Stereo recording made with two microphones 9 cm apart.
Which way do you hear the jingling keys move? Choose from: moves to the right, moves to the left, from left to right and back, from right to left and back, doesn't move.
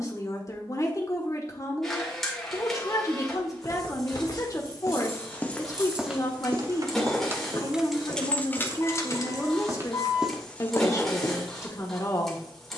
moves to the left.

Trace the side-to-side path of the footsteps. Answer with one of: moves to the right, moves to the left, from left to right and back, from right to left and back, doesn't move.
from left to right and back.